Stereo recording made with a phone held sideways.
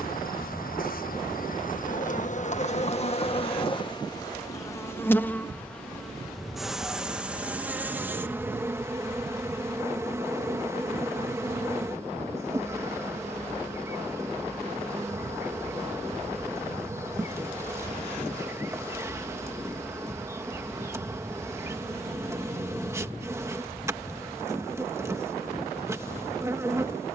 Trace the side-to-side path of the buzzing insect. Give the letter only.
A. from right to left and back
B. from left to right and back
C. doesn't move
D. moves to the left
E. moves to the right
E.